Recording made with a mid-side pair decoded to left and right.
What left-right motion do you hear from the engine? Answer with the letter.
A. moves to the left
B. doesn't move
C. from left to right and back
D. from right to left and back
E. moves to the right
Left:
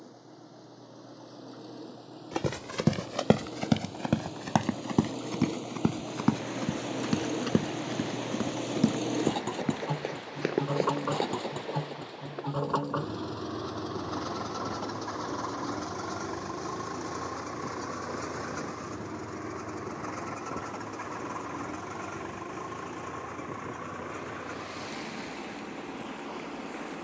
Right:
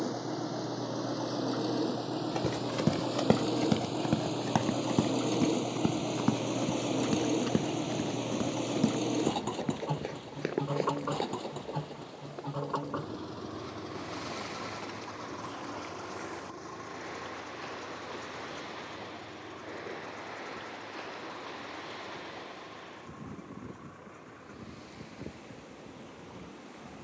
A.